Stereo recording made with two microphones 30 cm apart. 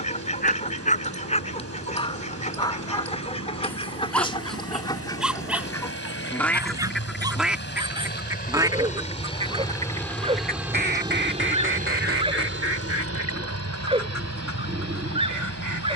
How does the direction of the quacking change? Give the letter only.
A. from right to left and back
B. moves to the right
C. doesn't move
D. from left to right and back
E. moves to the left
B.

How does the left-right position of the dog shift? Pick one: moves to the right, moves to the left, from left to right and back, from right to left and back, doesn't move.
moves to the right.